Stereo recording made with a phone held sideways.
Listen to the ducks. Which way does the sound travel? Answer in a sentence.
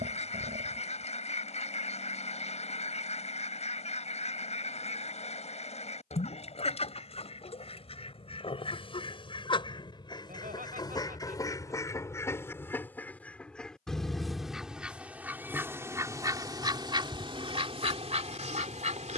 You can hear the ducks travel towards the right.